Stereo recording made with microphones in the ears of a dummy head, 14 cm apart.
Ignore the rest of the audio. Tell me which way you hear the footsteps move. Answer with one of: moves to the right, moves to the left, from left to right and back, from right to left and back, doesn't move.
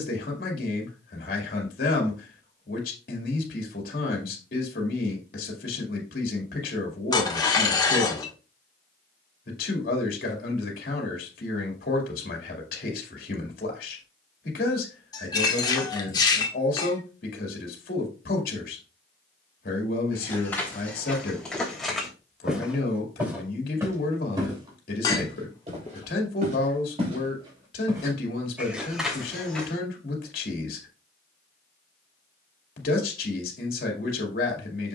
from left to right and back.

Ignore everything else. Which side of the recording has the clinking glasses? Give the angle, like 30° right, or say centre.
30° left.